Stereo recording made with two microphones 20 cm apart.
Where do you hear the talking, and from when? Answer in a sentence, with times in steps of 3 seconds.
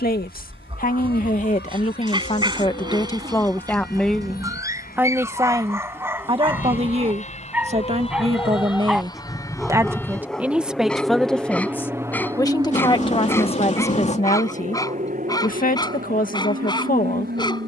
You can hear the talking on the left from 0 s, in the centre from 3 s, on the right from 6 s, in the centre from 9 s and on the left from 12 s.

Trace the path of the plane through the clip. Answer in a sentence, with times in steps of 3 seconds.
You can hear the plane on the left from 0 s, in the centre from 9 s and on the right from 12 s.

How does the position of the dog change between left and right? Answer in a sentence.
In this clip you hear the dog move from right to left.